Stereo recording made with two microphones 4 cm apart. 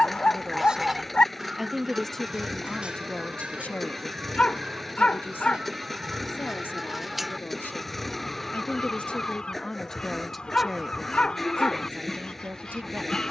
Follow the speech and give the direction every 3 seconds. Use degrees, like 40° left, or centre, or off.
centre, 40° left, 50° left, centre, 40° right.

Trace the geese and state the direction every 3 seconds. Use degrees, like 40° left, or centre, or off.
10° right, 20° right, centre, 20° left, 20° left.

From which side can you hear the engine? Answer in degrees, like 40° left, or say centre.
centre.